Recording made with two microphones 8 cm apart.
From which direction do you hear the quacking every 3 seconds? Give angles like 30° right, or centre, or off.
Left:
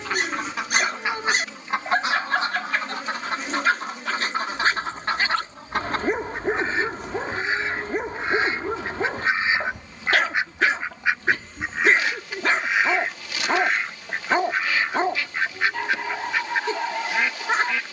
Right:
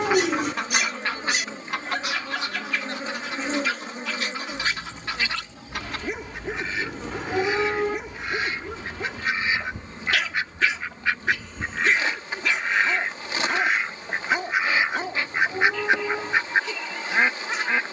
20° left, 50° left, 40° left, 20° left, centre, 20° right.